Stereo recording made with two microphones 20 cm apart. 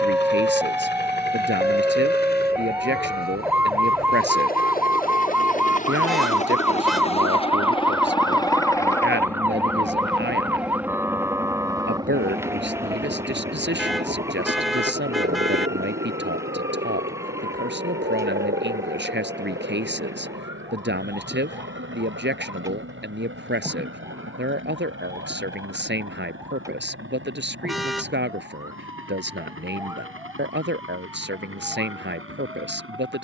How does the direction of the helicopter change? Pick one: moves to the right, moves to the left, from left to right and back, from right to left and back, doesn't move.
moves to the right.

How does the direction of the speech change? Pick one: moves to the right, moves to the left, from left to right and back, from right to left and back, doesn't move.
doesn't move.